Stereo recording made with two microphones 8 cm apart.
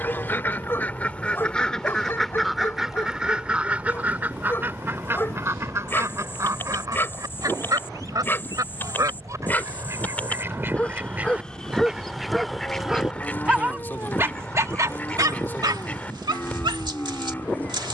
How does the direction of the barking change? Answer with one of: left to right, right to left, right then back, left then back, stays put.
left to right.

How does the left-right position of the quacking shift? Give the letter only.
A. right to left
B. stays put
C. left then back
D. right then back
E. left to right
D.